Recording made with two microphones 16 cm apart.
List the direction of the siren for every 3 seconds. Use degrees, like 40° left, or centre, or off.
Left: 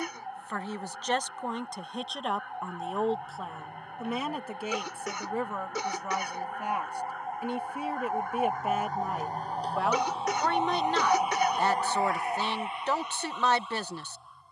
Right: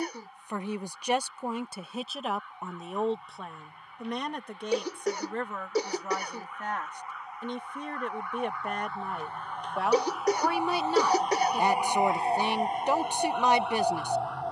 60° left, 60° left, 50° left, 20° left, 50° right.